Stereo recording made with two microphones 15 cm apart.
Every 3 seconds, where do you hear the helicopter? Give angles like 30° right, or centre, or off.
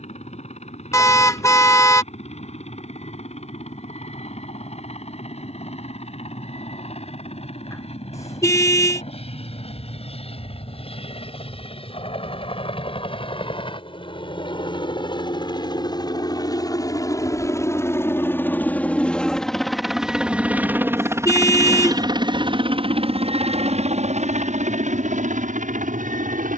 60° left, 50° left, 50° left, 50° left, 40° left, 30° left, centre, 40° right, 60° right.